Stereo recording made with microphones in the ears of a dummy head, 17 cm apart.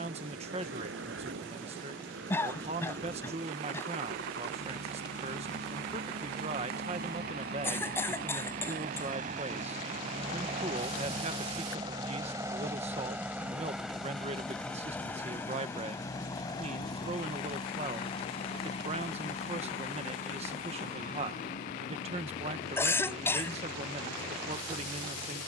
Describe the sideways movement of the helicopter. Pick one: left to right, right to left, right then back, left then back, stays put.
right to left.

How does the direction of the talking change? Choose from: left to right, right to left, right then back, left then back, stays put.
stays put.